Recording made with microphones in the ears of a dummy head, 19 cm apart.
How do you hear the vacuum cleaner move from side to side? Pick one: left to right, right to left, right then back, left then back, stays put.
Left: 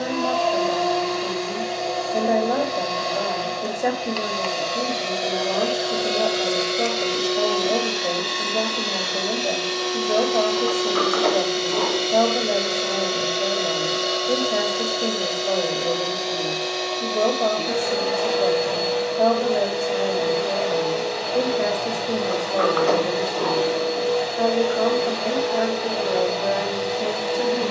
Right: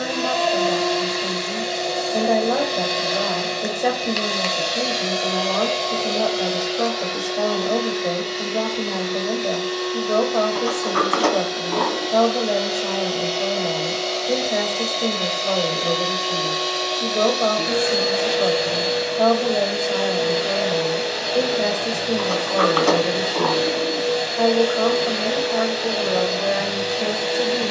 left then back.